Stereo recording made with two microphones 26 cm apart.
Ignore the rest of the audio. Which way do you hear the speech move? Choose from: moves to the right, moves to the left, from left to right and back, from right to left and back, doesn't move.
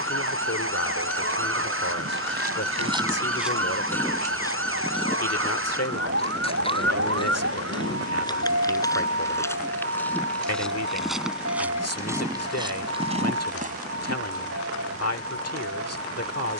doesn't move.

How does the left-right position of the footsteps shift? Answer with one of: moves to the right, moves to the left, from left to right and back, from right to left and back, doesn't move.
from right to left and back.